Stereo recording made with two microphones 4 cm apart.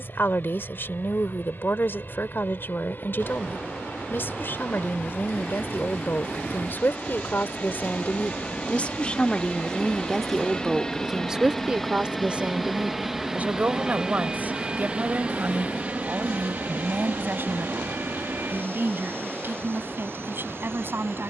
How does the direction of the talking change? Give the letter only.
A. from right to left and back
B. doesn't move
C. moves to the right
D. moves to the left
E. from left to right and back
C.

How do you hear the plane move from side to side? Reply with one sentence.
You can hear the plane move from left to right.